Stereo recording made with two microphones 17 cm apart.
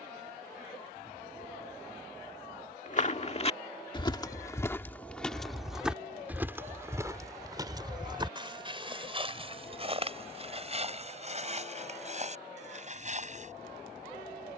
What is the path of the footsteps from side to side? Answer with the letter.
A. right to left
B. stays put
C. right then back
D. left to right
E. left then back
D.